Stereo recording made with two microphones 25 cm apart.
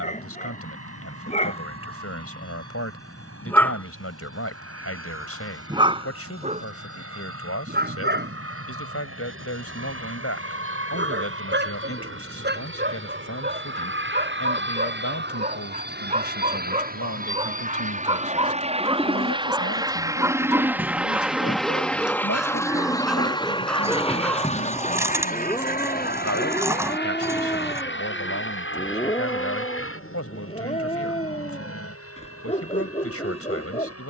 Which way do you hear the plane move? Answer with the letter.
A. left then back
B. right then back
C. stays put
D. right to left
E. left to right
D.